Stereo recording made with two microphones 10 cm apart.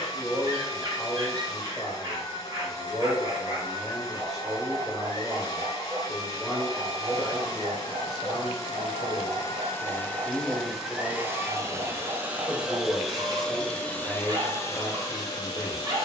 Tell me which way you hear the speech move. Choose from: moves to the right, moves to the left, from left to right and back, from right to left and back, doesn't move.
doesn't move.